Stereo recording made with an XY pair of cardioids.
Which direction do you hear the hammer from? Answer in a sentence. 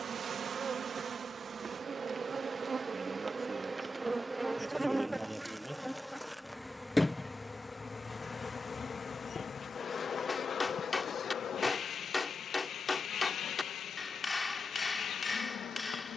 In this clip you hear the hammer on the left.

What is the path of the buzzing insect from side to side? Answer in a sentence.
In this clip you hear the buzzing insect go from the right side to the left.